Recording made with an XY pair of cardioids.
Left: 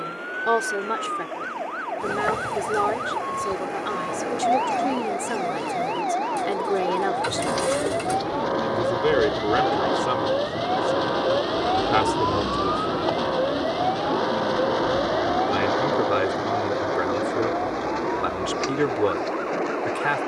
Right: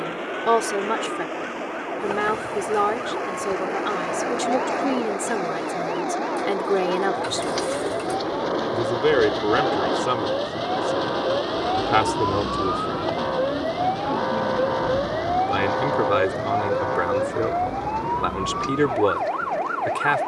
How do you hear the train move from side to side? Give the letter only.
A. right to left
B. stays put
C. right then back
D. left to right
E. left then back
A.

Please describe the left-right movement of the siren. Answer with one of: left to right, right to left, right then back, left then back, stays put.
left to right.